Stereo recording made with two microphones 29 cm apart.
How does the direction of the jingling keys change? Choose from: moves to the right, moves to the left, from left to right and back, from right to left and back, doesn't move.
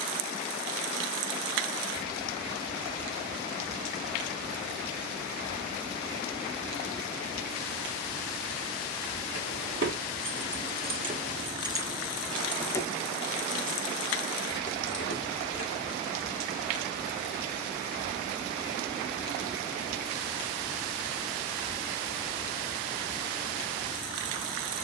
moves to the left.